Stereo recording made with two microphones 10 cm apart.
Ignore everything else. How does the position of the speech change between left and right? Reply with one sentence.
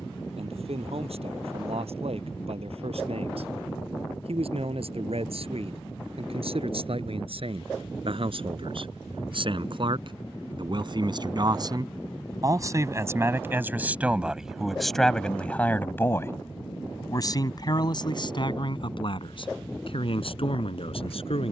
You can hear the speech travel towards the left.